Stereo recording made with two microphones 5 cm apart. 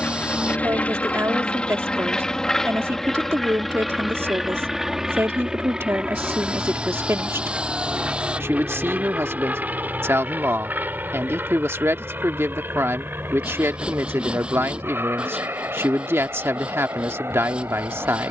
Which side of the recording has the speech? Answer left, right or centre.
right.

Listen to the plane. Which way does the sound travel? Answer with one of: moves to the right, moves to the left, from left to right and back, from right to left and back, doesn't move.
moves to the right.